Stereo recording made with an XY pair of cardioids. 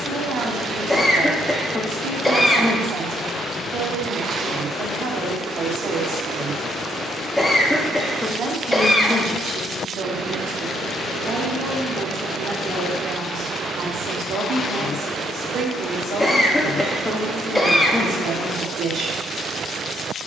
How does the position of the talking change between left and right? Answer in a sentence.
In this clip you hear the talking stay put.